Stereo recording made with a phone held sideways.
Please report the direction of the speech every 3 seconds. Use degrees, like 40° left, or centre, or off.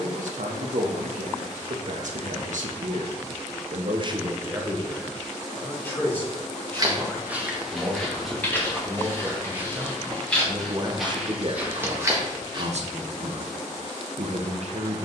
70° right, 20° right, 10° left, 30° right, 60° right.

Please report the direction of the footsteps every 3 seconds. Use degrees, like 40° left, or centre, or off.
off, off, centre, centre, 30° right.